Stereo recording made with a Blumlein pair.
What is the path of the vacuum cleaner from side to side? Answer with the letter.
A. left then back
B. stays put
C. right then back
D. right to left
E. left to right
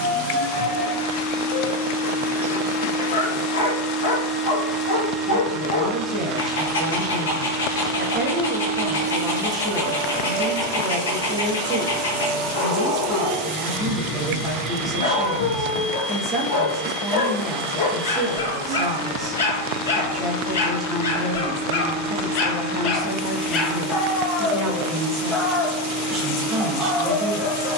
E.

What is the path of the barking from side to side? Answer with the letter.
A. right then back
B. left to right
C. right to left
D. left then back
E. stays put
B.